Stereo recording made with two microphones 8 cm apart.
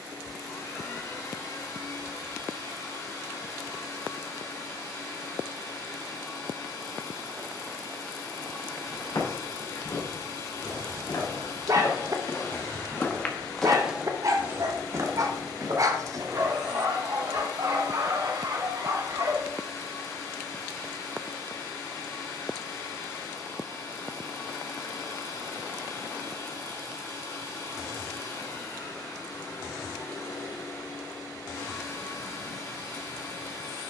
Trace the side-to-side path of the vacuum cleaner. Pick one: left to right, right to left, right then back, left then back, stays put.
stays put.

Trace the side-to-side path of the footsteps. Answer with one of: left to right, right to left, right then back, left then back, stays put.
left to right.